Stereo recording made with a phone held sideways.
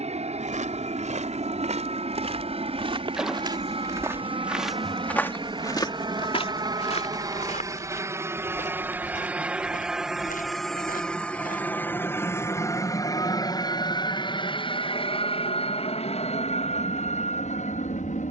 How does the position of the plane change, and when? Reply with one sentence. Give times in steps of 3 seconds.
You can hear the plane on the right from 0 s, in the centre from 9 s and on the left from 12 s.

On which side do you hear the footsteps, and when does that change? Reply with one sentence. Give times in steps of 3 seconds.
In this clip you hear the footsteps on the right from 0 s, in the centre from 3 s, on the left from 6 s and not at all from 12 s.